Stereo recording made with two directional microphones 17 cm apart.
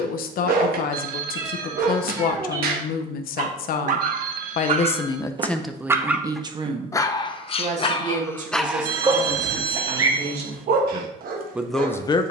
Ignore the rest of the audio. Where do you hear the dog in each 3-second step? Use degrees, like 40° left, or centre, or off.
60° right, 40° right, 20° left, 50° right.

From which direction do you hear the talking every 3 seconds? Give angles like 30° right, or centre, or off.
60° left, 40° left, 40° right, 30° right.